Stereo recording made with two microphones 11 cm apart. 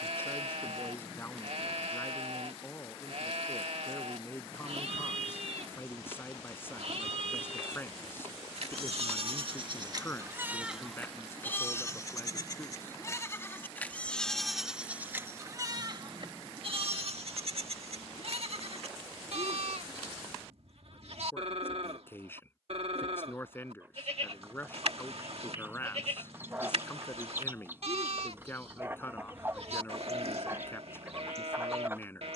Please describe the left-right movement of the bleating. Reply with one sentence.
In this clip you hear the bleating move from right to left and back again.